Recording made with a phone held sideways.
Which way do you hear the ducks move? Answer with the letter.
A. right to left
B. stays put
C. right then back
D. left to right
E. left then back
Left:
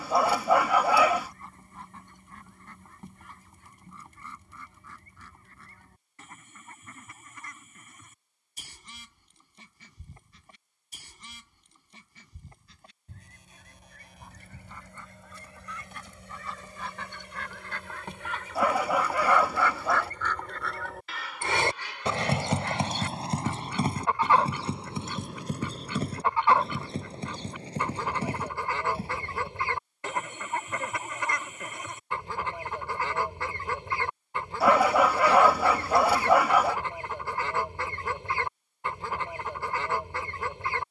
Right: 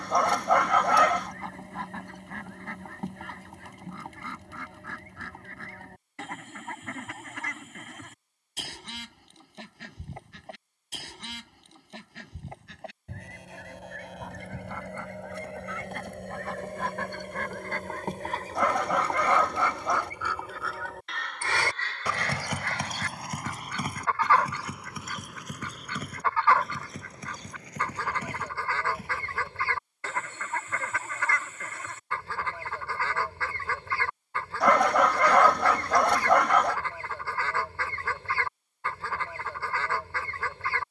A.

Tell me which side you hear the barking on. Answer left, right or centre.
centre.